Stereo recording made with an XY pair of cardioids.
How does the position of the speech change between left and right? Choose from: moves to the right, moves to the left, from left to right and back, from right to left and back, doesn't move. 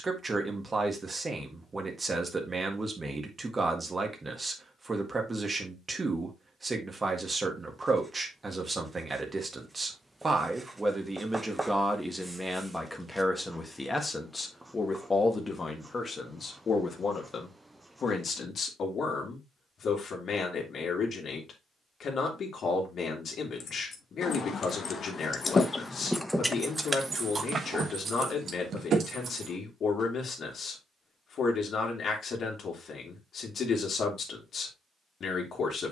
moves to the left.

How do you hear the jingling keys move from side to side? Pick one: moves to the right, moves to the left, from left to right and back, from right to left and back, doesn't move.
moves to the right.